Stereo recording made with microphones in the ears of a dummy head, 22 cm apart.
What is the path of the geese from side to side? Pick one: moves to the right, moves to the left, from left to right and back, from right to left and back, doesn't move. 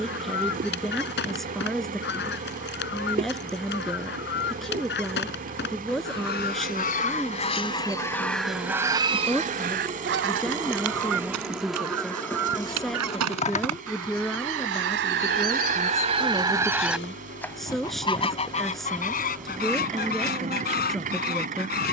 from left to right and back.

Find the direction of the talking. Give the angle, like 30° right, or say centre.
centre.